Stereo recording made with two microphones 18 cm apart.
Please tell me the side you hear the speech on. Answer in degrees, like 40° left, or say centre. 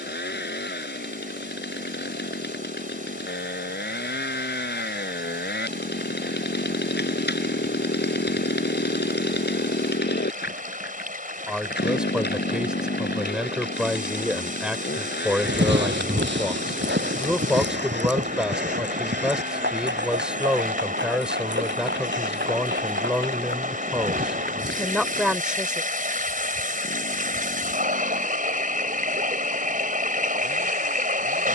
centre.